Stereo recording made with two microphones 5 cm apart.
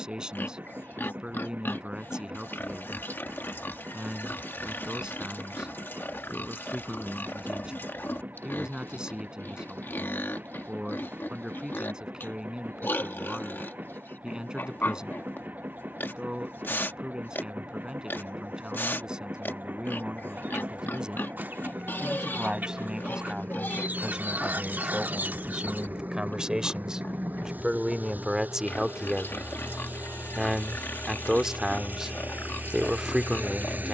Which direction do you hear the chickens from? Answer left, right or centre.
right.